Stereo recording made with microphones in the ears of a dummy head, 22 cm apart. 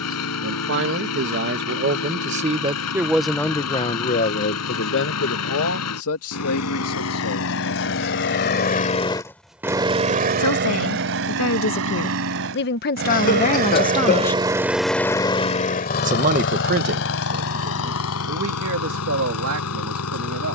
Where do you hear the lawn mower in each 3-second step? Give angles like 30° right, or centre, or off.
70° left, 70° left, 60° left, 40° right, 40° right, 50° left, 70° left.